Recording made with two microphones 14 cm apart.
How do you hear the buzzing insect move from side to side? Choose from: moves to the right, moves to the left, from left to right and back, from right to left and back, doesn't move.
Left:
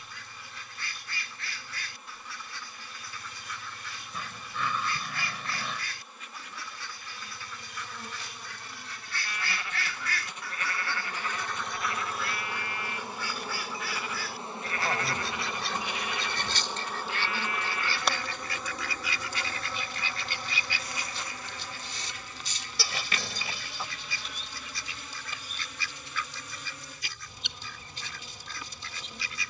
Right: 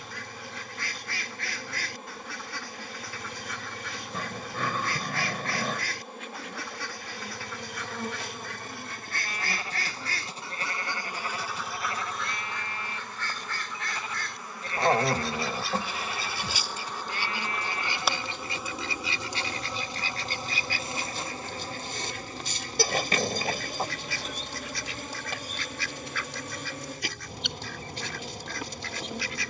from right to left and back.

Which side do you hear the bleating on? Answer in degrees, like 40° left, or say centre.
30° right.